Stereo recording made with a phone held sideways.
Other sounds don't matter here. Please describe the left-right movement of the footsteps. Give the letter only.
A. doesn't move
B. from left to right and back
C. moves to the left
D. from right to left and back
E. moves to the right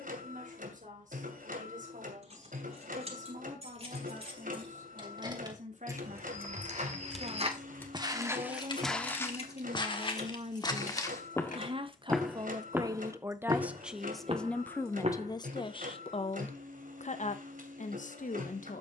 D.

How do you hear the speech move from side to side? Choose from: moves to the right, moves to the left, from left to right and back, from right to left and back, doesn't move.
moves to the left.